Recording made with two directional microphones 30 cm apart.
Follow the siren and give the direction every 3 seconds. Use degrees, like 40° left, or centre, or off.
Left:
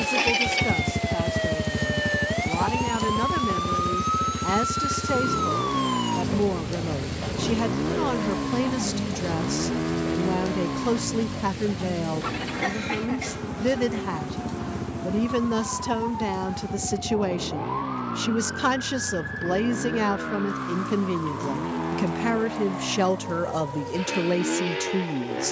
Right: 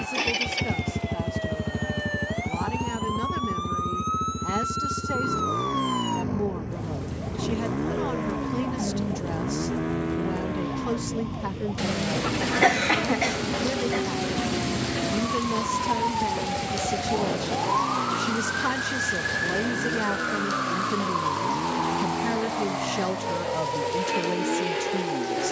40° left, 20° left, centre, 20° right, 30° right, 40° right, 50° right, 50° right, 50° right.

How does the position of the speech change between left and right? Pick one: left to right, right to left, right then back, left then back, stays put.
stays put.